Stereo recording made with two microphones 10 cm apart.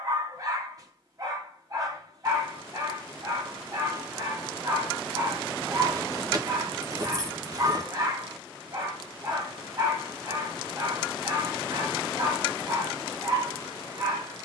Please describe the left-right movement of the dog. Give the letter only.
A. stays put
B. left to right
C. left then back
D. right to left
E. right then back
A.